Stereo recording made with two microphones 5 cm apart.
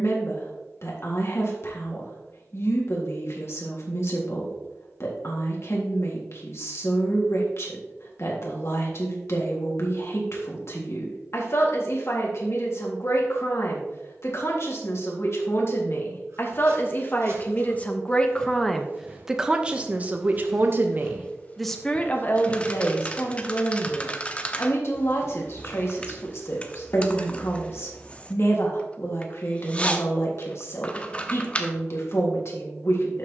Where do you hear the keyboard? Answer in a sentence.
In this clip you hear the keyboard on the left.